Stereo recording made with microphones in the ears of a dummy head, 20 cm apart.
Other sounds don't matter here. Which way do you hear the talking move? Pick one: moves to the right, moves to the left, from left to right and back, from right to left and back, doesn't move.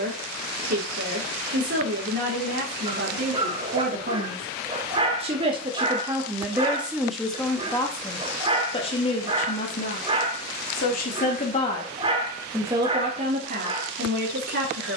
from right to left and back.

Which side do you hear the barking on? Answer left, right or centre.
right.